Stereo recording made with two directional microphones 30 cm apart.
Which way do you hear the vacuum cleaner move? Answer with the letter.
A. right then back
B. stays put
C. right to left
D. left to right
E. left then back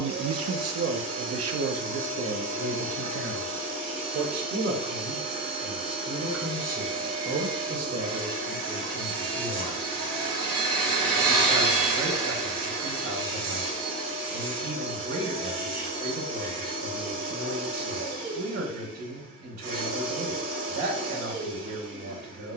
B.